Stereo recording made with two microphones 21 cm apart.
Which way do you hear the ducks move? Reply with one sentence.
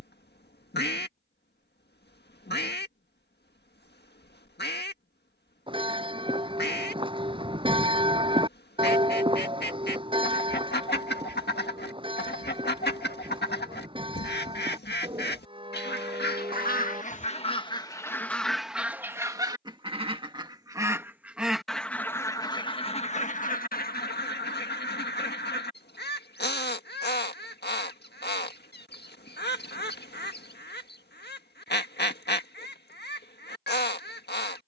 In this clip you hear the ducks go right and come back.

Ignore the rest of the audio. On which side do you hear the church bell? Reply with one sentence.
In this clip you hear the church bell on the right.